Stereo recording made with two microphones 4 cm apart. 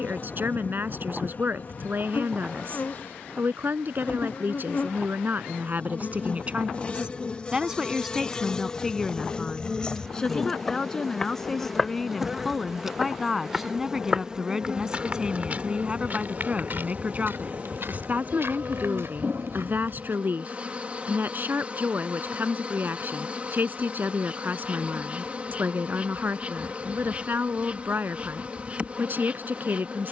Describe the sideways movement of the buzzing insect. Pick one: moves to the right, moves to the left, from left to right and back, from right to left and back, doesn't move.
moves to the right.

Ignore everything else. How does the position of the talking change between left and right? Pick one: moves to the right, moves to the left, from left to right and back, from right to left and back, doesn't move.
from right to left and back.